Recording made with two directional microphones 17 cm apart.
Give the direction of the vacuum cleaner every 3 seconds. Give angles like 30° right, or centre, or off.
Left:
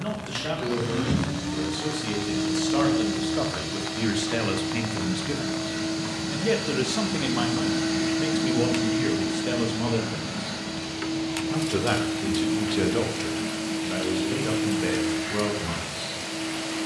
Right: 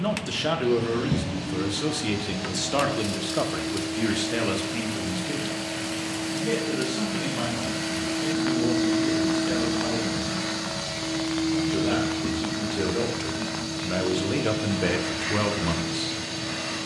60° left, 60° left, 30° left, 40° right, 60° right, 60° right.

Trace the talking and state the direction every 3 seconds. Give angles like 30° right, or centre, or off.
30° right, centre, 50° left, 60° left, centre, 30° right.